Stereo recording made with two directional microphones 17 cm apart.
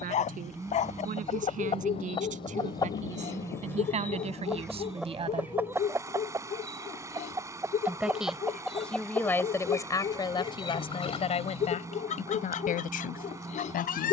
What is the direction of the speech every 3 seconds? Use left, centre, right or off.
right, right, centre, left, left.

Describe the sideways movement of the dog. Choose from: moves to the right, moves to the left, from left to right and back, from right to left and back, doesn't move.
doesn't move.